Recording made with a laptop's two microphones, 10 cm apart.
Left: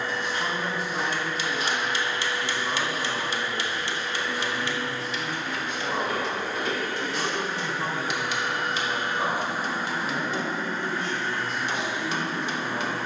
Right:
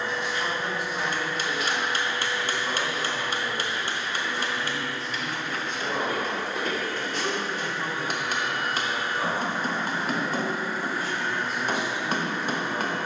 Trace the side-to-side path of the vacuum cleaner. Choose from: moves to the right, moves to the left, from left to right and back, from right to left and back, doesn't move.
from right to left and back.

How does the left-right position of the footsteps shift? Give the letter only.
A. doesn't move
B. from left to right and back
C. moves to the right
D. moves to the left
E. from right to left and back
C.